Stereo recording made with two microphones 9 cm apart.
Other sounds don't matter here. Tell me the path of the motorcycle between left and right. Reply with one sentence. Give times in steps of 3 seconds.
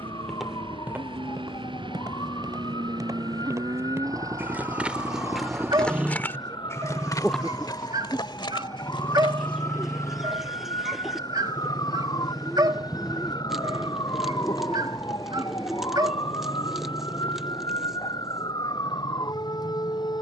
You can hear the motorcycle on the right from 0 s, in the centre from 6 s and on the left from 9 s.